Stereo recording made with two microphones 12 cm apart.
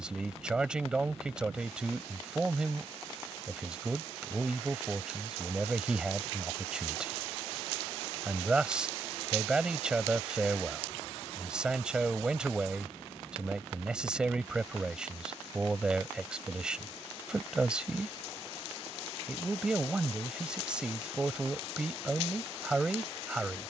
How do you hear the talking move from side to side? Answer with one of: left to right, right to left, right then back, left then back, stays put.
stays put.